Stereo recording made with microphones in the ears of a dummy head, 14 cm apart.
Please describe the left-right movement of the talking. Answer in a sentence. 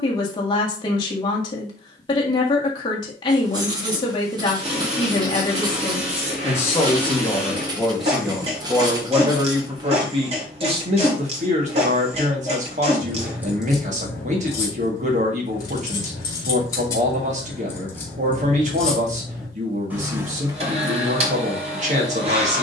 You can hear the talking move from left to right.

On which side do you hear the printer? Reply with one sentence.
You can hear the printer on the right.